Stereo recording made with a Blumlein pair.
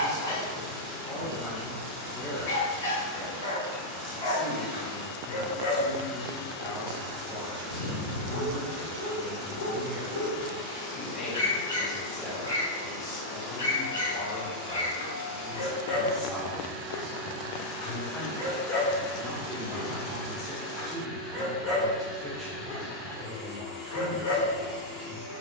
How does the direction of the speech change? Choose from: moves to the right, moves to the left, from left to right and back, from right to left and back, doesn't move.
moves to the right.